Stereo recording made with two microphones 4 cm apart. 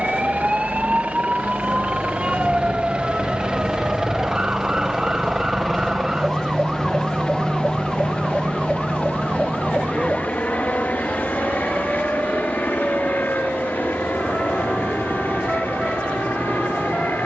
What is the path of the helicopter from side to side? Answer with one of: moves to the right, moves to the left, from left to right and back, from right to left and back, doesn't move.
moves to the left.